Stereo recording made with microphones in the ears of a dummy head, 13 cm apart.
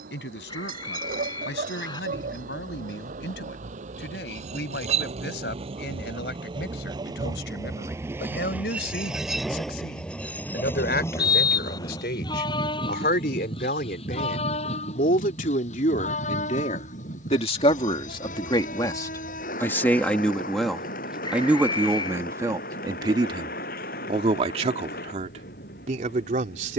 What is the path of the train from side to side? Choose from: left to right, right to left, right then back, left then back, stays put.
right to left.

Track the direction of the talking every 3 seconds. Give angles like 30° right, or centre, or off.
80° left, 80° left, 80° left, 70° left, 60° left, 50° left, 20° left, 20° right, 40° right.